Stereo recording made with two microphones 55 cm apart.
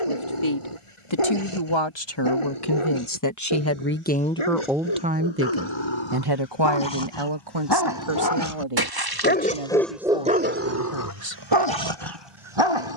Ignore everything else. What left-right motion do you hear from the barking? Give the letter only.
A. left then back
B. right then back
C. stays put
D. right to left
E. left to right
E.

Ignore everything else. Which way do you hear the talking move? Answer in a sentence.
You can hear the talking move from left to right.